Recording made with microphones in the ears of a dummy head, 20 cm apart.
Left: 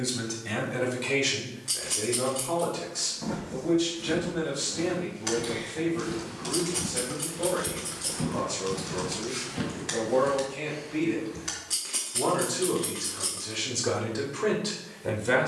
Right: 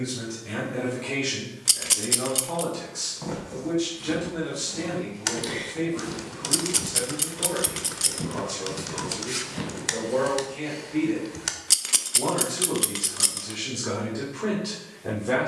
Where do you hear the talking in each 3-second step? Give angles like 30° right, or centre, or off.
10° left, 20° right, 20° right, 10° right, 10° left.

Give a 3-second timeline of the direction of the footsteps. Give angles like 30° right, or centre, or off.
off, 30° right, centre, 20° right, off.